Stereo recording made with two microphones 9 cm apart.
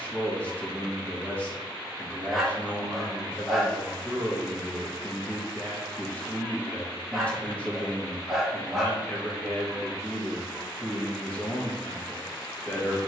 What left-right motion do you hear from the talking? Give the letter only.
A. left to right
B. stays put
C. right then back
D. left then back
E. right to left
B.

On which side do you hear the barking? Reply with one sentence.
You can hear the barking in the centre.